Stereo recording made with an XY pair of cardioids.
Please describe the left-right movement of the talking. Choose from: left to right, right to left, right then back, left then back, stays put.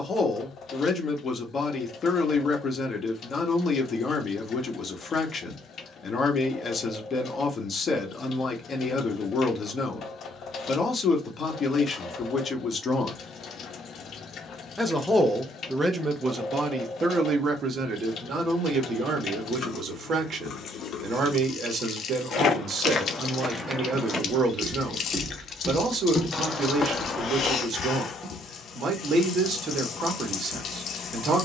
left to right.